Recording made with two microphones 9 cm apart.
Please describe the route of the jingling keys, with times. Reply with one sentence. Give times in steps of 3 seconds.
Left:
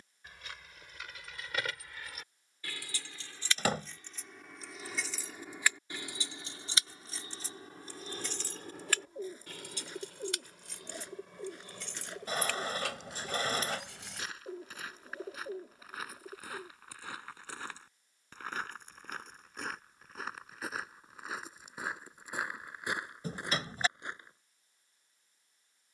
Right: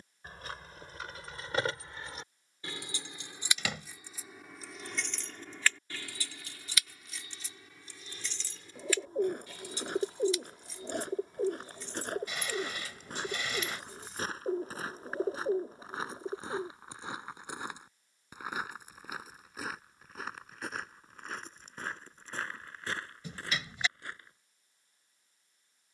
In this clip you hear the jingling keys on the right from 0 s, in the centre from 3 s, on the left from 6 s and not at all from 15 s.